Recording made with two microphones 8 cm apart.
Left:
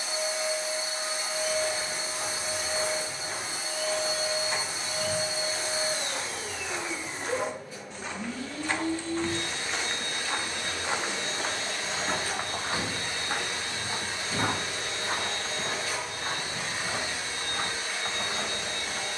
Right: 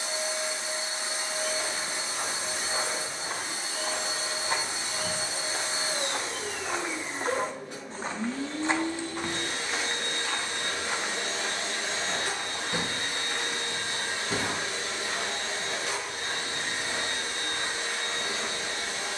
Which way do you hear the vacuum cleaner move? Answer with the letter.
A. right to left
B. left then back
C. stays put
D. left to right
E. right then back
C.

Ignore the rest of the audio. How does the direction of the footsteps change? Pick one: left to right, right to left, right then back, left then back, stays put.
right to left.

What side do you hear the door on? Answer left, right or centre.
right.